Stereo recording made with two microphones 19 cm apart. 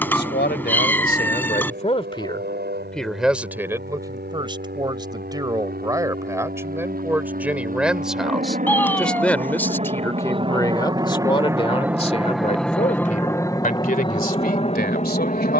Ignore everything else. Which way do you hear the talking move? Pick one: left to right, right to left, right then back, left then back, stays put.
right then back.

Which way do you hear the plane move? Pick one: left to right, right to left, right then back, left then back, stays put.
right to left.